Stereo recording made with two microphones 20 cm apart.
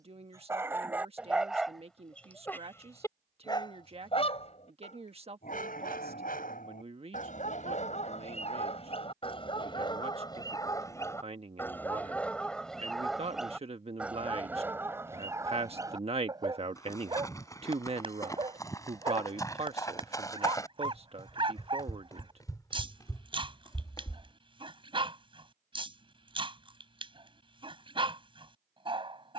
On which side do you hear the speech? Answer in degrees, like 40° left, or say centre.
30° right.